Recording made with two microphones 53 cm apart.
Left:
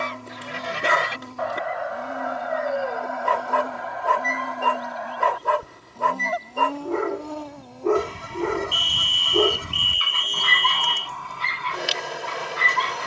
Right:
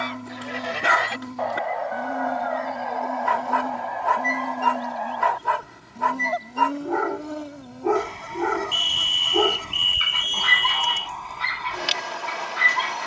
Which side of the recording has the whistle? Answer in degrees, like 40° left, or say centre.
centre.